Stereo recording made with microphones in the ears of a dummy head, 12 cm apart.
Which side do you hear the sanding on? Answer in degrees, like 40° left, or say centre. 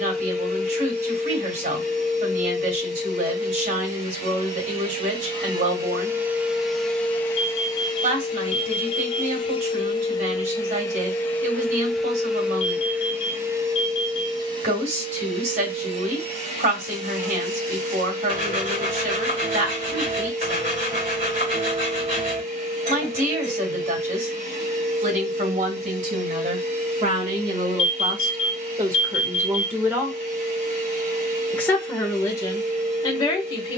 60° right.